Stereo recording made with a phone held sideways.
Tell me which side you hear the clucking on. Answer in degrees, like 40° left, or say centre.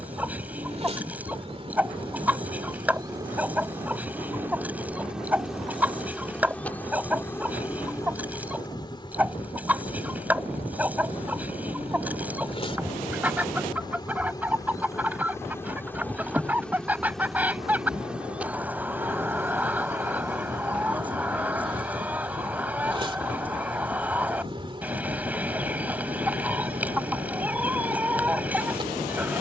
10° right.